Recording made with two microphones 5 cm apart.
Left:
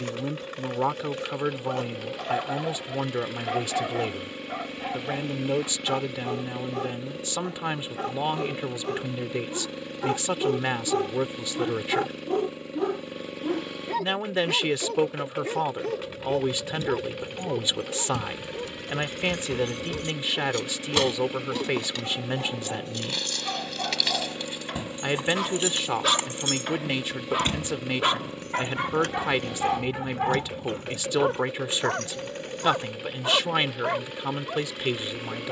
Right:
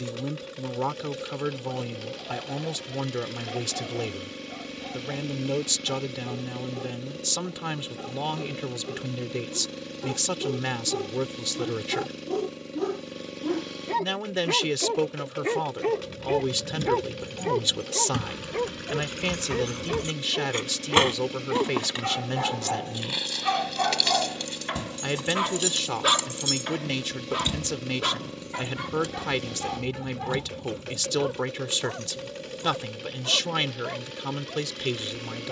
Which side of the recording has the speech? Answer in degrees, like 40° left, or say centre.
20° left.